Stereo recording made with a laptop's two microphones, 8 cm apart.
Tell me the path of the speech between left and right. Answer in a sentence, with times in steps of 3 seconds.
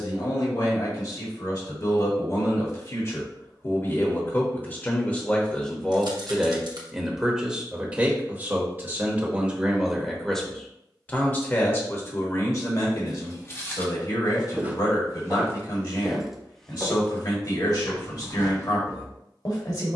In this clip you hear the speech on the left from 0 s, in the centre from 6 s and on the left from 12 s.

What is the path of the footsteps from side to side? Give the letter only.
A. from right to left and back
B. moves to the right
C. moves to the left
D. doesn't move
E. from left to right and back
E.